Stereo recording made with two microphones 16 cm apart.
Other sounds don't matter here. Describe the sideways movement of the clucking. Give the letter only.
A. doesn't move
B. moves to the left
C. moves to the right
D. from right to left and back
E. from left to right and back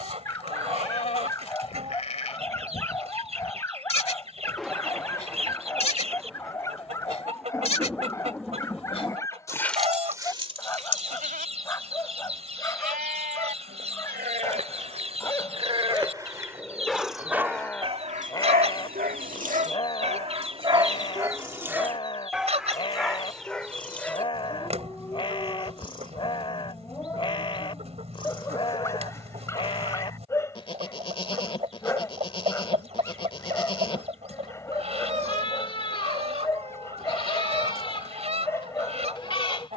A.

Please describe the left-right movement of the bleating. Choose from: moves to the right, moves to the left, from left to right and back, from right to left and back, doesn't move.
from left to right and back.